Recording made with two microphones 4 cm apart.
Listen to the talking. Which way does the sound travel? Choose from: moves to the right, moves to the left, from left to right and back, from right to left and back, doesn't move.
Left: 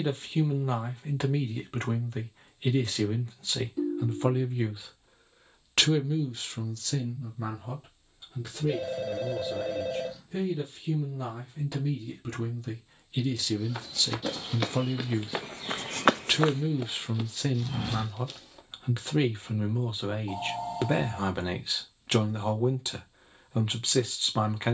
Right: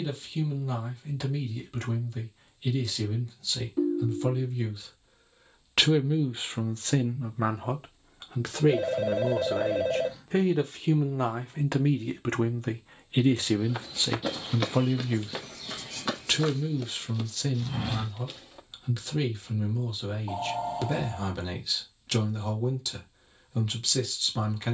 from left to right and back.